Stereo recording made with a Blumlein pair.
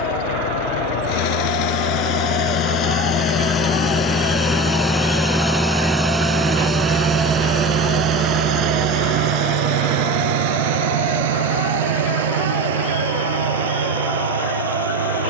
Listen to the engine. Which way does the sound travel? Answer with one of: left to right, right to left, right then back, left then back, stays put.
left to right.